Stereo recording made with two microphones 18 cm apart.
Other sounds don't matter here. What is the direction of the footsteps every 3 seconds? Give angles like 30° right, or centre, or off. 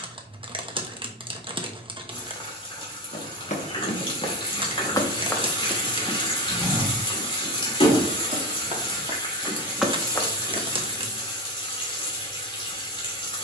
off, 30° left, 20° right, centre, off.